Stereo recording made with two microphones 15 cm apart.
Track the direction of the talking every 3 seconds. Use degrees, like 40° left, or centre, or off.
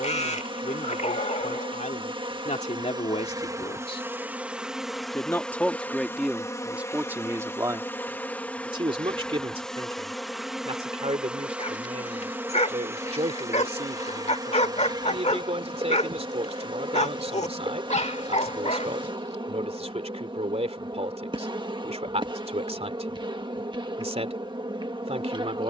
60° left, 30° left, 20° right, 40° right, 50° right, 50° right, 50° right, 50° right, 50° right.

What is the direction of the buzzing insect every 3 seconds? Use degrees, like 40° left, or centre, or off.
30° right, 10° right, 10° left, centre, 20° right, 30° right, 30° right, 30° right, 30° right.